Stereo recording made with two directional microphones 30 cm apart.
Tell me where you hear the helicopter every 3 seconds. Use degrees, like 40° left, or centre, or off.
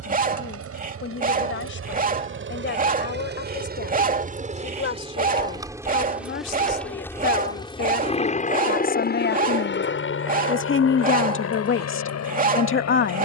50° right, 20° right, 10° left, 40° left, 60° left.